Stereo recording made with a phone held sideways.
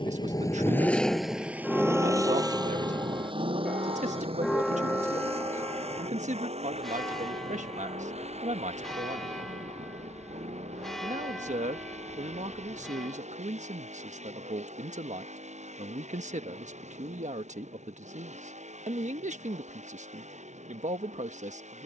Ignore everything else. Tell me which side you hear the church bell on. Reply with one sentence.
You can hear the church bell in the centre.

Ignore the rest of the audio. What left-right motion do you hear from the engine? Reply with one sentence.
In this clip you hear the engine move from left to right.